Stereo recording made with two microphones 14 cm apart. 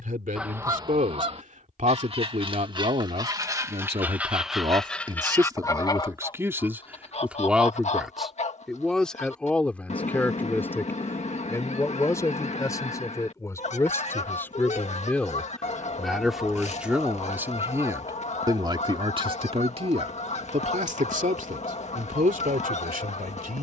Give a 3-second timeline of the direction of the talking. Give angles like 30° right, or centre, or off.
60° right, 40° right, 10° right, 10° left, 20° left, centre, 40° right, 70° right.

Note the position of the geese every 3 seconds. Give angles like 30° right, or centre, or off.
30° right, centre, 50° left, 50° left, 50° left, 50° left, 50° left, 50° left.